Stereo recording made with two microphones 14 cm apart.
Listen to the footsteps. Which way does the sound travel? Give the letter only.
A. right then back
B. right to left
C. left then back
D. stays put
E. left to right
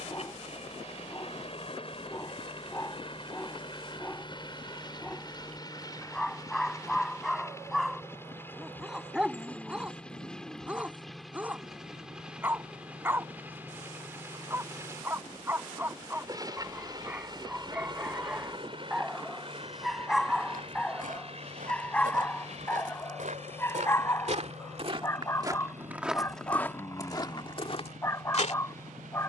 B.